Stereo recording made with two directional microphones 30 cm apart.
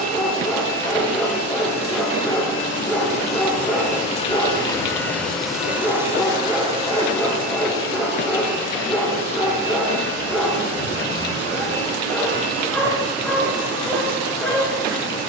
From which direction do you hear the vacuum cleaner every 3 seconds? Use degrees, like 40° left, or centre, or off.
50° left, 10° left, 30° right, 50° right, 60° right.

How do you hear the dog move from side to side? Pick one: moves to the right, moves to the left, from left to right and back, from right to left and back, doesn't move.
doesn't move.